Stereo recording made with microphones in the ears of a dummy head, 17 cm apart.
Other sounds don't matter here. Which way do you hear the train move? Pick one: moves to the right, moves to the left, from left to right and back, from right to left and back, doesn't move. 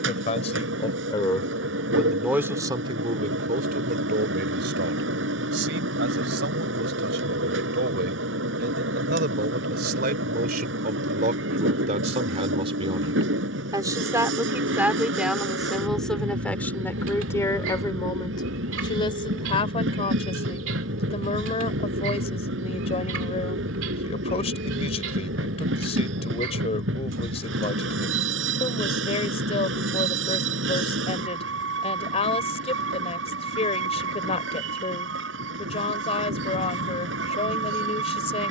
doesn't move.